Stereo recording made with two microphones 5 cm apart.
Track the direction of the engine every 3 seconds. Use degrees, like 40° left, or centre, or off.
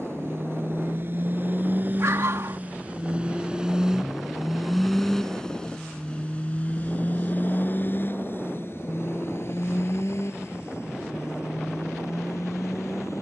40° right, centre, 40° left, 60° left, 70° left.